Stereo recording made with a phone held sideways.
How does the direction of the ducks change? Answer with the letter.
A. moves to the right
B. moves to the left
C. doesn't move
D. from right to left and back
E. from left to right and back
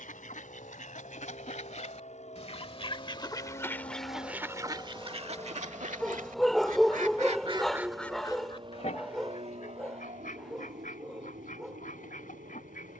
E.